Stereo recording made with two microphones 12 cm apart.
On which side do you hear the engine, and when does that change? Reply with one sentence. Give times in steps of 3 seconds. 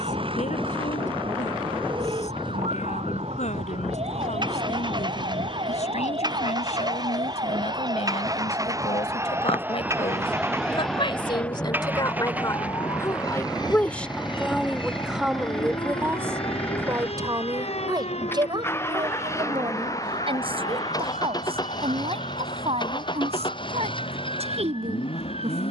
In this clip you hear the engine on the right from 0 s, in the centre from 12 s and on the left from 18 s.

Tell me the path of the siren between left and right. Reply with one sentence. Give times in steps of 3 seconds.
In this clip you hear the siren on the right from 0 s, in the centre from 9 s and on the left from 12 s.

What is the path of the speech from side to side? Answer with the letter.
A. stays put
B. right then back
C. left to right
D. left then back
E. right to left
C.